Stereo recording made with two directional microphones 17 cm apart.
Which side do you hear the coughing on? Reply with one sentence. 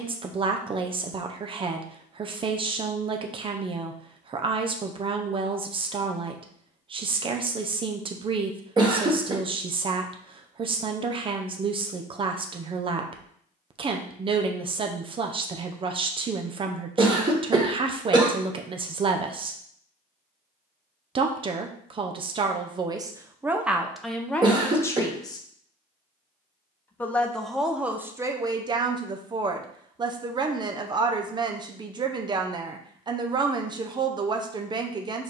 In this clip you hear the coughing on the right.